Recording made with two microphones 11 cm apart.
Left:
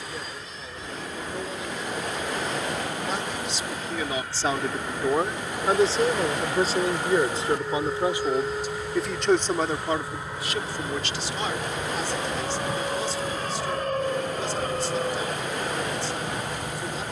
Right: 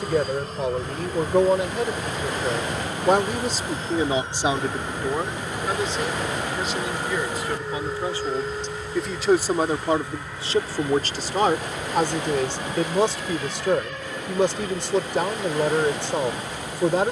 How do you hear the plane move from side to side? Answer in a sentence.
In this clip you hear the plane travel towards the left.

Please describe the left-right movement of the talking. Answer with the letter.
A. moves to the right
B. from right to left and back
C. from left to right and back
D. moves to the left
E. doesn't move
B.